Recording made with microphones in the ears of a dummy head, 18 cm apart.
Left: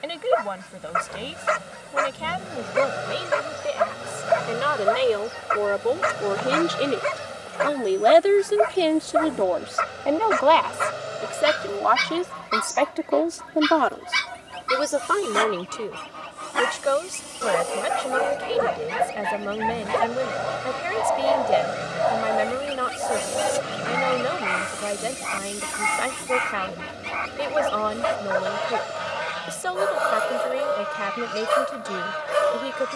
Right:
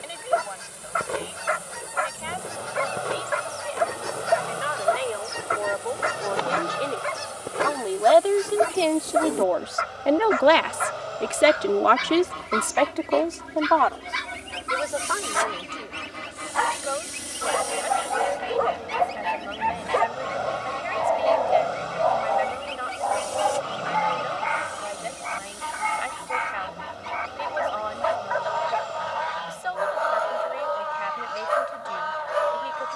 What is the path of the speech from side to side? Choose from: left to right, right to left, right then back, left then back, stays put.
right then back.